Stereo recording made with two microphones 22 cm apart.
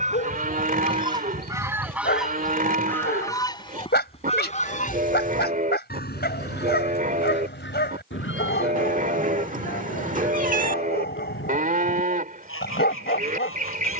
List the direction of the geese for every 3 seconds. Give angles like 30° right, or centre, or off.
10° right, 30° left, 60° left, 70° left, 70° left.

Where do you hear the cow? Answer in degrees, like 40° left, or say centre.
40° right.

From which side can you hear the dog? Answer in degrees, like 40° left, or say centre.
50° left.